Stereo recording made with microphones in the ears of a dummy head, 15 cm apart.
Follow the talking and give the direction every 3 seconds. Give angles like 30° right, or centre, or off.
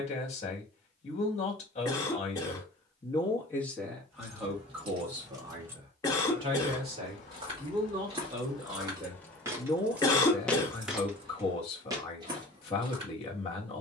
40° left, centre, 20° right, 30° left, 30° left.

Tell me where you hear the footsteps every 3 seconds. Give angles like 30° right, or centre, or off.
off, off, 30° right, 10° right, 30° right.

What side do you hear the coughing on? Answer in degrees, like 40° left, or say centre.
20° left.